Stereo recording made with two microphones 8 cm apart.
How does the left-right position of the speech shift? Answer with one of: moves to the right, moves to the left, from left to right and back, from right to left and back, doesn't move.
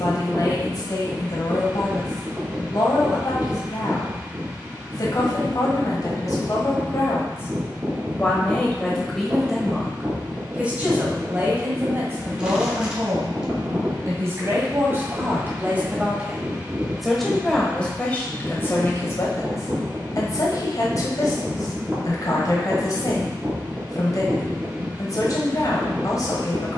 from left to right and back.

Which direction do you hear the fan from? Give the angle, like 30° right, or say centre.
20° right.